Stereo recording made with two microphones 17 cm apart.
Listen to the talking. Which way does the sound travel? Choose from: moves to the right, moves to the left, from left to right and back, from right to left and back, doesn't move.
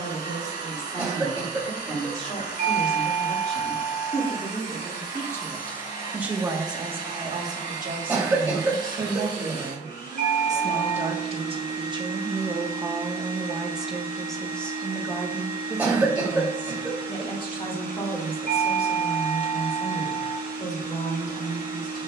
from left to right and back.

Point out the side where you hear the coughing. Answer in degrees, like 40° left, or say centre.
10° right.